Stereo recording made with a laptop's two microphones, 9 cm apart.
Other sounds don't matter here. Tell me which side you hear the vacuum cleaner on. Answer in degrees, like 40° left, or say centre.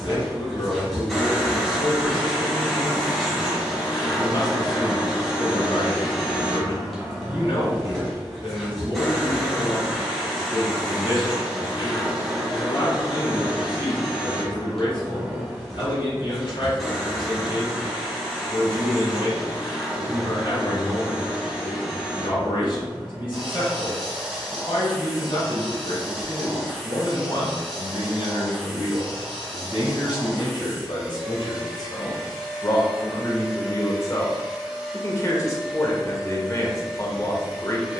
centre.